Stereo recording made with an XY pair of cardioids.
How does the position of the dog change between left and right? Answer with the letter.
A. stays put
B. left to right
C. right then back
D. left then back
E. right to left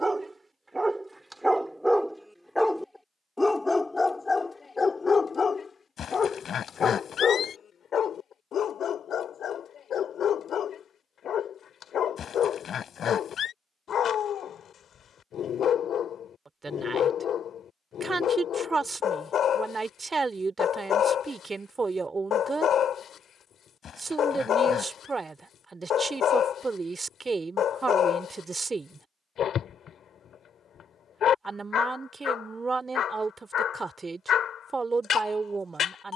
E.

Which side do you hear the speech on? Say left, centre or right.
right.